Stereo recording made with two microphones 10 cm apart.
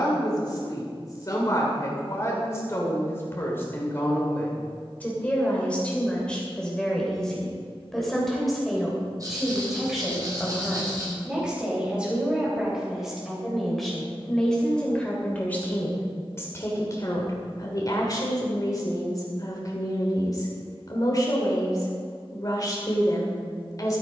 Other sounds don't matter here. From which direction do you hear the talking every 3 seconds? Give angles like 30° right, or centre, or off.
30° left, 20° left, 10° left, 10° right, centre, 30° left, 40° left, 40° left.